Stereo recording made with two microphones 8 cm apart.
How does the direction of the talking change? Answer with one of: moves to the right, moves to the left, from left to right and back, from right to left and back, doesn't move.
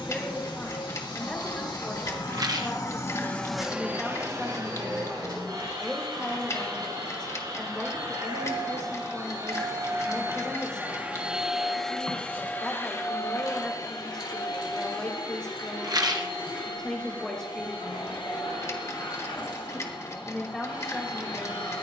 doesn't move.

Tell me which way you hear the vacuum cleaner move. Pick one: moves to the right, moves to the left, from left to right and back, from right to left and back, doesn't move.
from left to right and back.